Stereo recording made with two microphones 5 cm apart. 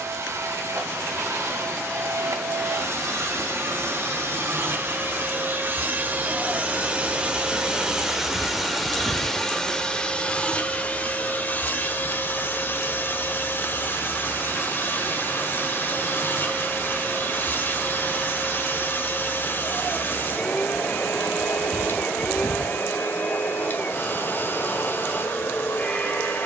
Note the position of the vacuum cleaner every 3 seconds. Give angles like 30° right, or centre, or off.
60° right, 50° right, 20° right, 20° left, 40° left, 40° left, 40° left, 40° left, 40° left.